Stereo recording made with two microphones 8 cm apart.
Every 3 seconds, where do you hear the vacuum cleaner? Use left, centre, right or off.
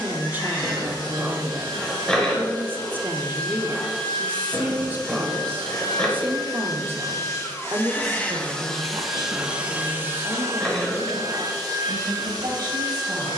left, left, left, right, right.